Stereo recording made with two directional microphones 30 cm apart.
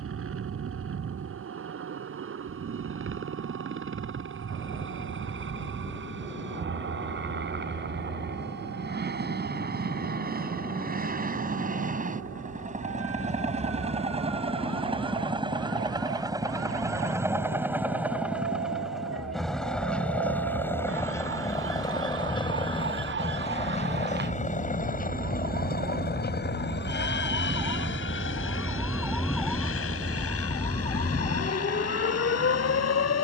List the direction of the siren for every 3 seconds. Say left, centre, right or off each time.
right, right, right, right, right, right, right, right, right, centre, left.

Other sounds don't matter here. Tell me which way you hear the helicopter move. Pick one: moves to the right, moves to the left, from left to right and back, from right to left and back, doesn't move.
moves to the left.